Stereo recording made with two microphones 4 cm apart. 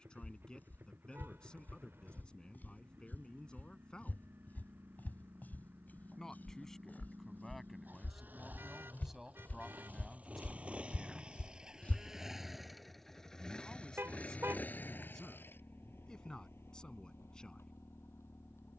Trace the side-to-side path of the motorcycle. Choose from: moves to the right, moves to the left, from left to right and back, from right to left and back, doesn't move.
moves to the left.